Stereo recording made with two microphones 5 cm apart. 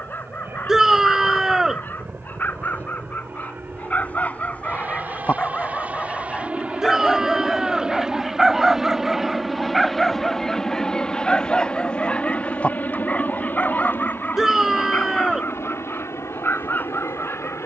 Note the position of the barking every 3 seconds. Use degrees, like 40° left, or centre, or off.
40° left, 30° left, centre, centre, 20° left, 40° left.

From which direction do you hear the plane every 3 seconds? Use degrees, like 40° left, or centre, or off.
50° right, 40° right, 20° right, 10° left, 40° left, 60° left.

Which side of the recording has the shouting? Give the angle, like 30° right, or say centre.
10° right.